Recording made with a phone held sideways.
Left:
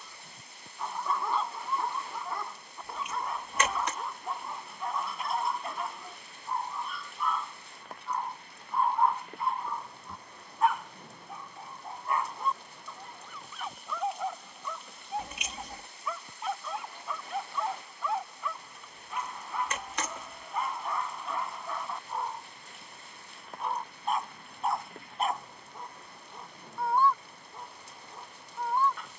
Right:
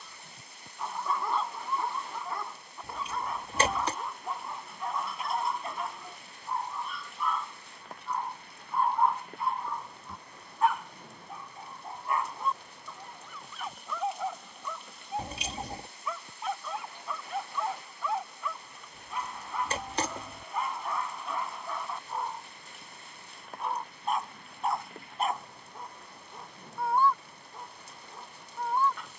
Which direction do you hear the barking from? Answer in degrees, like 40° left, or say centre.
centre.